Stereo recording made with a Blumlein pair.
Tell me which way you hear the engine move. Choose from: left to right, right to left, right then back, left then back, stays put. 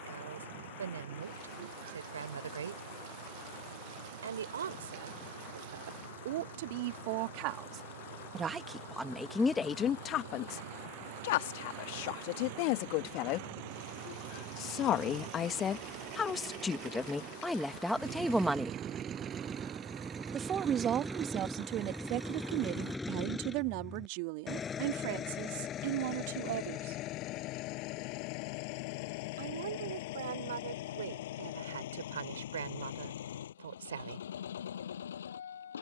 right to left.